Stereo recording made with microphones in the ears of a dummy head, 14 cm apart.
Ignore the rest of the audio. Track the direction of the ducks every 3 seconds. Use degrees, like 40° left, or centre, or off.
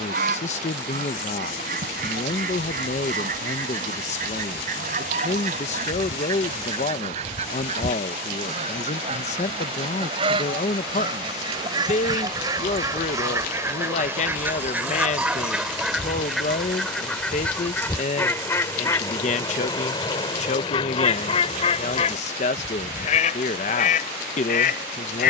50° right, 50° right, 40° right, 30° right, 20° right, centre, 20° left, 40° left, 50° left.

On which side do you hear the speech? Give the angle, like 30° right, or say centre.
40° left.